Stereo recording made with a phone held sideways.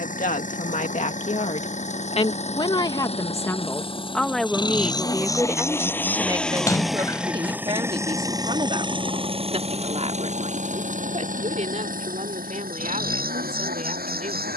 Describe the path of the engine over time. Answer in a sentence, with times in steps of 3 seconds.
You can hear the engine on the left from 0 s, in the centre from 6 s and on the right from 9 s.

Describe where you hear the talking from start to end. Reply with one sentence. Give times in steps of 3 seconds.
You can hear the talking on the left from 0 s, in the centre from 3 s and on the right from 6 s.